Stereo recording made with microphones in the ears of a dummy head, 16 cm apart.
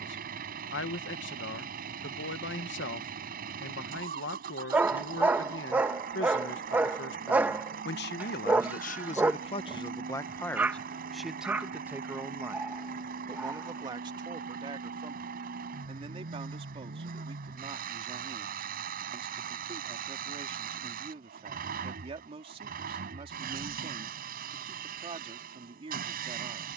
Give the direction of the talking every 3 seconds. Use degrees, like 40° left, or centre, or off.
70° left, 70° left, 60° left, 10° left, 20° right, 30° right, 30° right, 30° right, 30° right.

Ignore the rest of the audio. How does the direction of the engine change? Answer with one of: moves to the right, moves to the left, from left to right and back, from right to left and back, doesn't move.
doesn't move.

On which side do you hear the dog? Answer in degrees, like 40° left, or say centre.
10° right.